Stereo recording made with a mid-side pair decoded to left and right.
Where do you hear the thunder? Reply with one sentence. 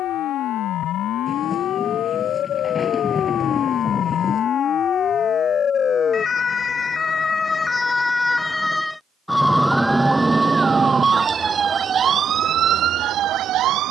In this clip you hear the thunder on the left.